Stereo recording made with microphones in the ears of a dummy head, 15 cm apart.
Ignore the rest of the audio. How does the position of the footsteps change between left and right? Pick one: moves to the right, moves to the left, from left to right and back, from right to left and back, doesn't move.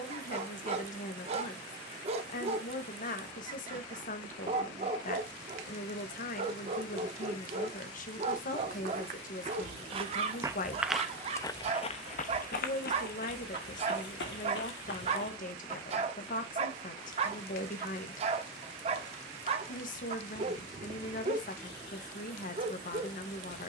moves to the left.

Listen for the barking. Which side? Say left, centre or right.
right.